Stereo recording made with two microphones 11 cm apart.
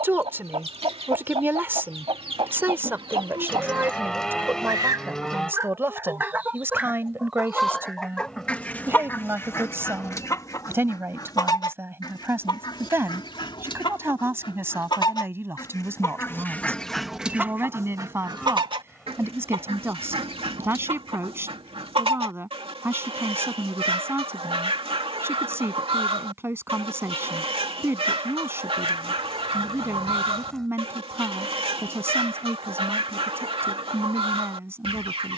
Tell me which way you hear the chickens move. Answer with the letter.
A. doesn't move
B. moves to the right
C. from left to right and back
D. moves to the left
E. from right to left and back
E.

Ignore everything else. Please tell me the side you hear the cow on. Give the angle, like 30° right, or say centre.
10° left.